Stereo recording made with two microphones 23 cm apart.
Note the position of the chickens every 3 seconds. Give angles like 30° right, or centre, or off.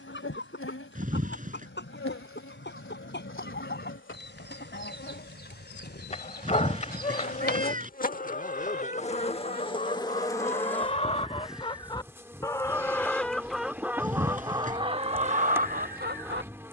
50° left, 50° left, 40° left, 30° left, centre, 40° right.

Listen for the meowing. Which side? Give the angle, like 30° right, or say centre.
40° right.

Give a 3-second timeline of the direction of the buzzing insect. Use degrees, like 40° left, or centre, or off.
60° left, 60° left, 40° left, 10° left, 10° right, 10° right.